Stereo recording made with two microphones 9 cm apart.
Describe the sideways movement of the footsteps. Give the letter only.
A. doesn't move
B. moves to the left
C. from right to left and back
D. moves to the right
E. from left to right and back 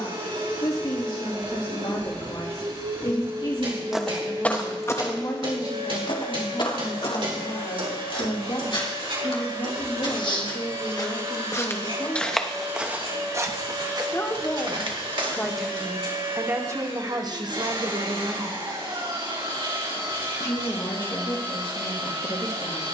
C.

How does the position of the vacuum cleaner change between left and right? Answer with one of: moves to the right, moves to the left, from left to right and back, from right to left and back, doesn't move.
doesn't move.